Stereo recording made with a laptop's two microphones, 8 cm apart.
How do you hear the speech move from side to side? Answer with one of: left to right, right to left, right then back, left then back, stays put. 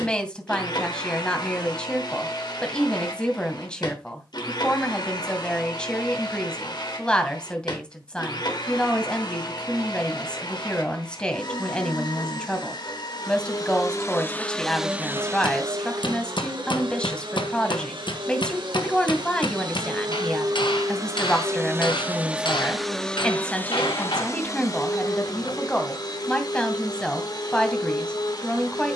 stays put.